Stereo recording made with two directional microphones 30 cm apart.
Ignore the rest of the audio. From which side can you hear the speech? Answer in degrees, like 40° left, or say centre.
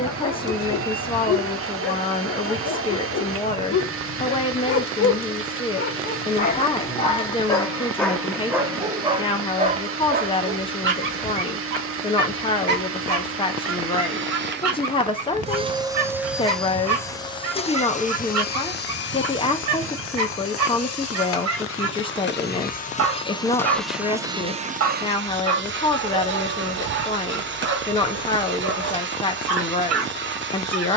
20° left.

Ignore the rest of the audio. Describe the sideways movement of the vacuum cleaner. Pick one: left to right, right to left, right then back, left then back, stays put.
left then back.